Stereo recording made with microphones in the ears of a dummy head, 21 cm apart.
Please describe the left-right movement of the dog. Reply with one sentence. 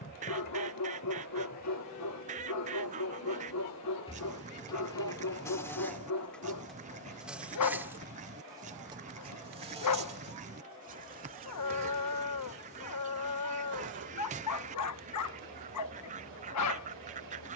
You can hear the dog stay in one place.